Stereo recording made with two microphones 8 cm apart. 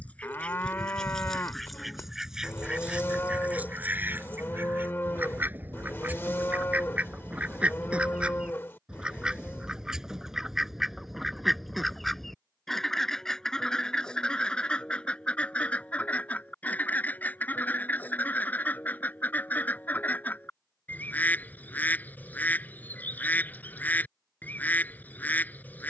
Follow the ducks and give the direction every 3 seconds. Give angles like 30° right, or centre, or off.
centre, 20° right, 20° right, centre, 10° left, 20° left, 20° left, 20° left, 20° left.